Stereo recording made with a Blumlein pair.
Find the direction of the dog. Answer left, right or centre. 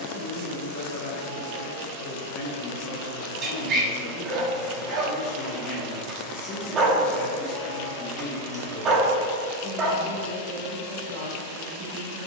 right.